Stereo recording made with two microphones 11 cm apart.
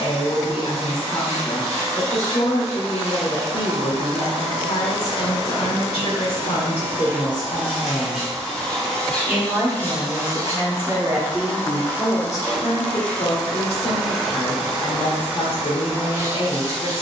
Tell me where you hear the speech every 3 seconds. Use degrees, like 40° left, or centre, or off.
70° left, 70° left, 50° left, 20° right, 50° left, 60° left.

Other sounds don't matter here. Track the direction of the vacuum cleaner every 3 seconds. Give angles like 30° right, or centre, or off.
30° right, 30° right, 10° right, 20° left, 10° left, 20° right.